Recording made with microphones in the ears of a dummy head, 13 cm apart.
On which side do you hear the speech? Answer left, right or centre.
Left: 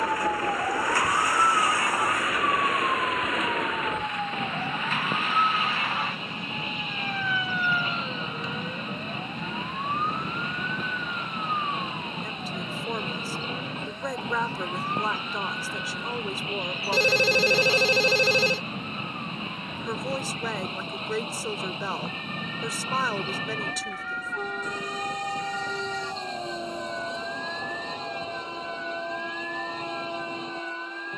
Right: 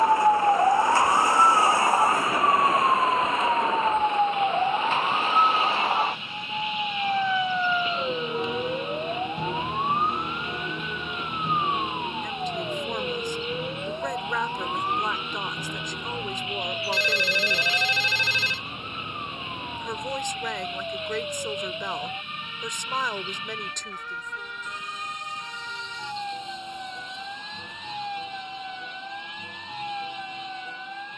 centre.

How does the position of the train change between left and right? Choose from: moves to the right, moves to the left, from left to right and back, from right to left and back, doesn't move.
doesn't move.